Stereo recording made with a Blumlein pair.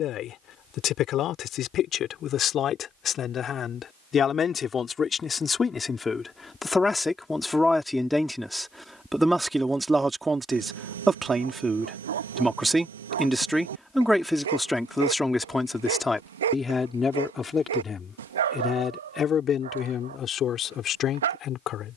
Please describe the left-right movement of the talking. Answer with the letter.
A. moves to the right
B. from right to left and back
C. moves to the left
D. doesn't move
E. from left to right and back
E.